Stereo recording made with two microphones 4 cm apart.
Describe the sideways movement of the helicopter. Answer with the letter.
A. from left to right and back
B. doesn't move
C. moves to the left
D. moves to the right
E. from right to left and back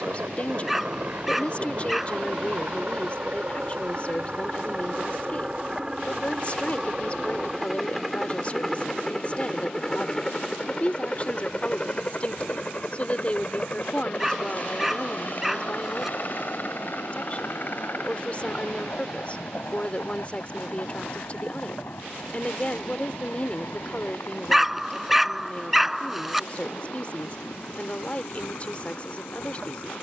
C.